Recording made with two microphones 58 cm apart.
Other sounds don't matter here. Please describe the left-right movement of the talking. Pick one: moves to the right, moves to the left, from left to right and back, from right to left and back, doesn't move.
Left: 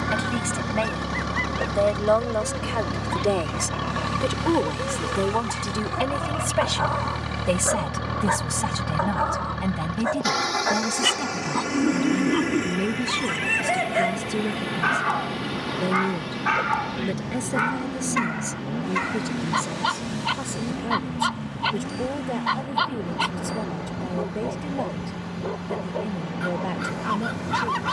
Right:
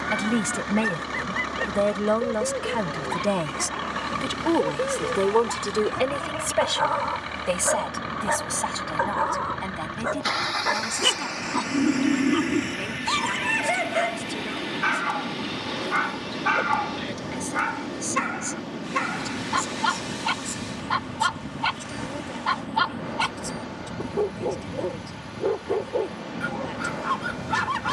moves to the left.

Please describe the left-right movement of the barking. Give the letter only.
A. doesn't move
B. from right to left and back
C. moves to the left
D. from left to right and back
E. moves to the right
B.